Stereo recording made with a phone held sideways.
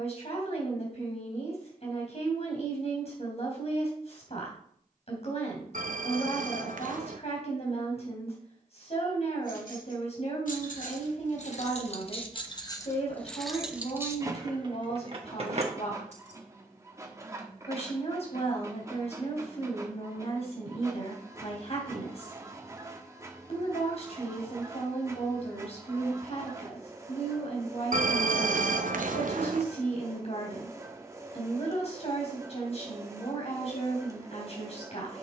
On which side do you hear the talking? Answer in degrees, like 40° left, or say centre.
50° left.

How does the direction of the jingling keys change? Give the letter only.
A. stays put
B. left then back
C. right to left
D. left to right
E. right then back
D.